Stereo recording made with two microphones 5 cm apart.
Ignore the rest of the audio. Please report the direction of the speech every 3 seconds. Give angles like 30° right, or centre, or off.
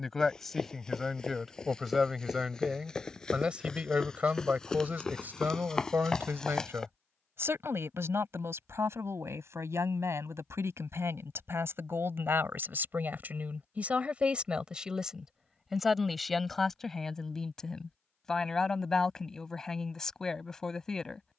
centre, 30° right, 60° right, 70° right, 40° right, centre, 10° left.